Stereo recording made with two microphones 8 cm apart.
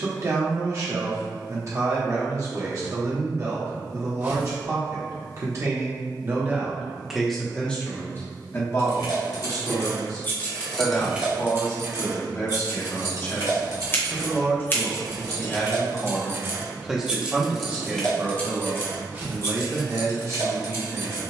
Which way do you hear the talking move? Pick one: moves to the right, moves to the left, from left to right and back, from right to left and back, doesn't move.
from right to left and back.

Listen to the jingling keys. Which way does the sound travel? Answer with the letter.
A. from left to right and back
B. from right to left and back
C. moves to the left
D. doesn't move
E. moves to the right
A.